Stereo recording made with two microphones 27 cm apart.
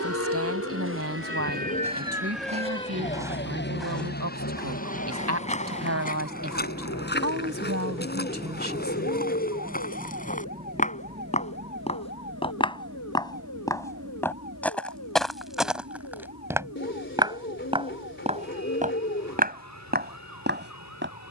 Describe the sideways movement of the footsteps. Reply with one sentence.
In this clip you hear the footsteps go left and come back.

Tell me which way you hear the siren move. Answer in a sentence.
You can hear the siren travel towards the left.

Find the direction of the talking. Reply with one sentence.
You can hear the talking on the right.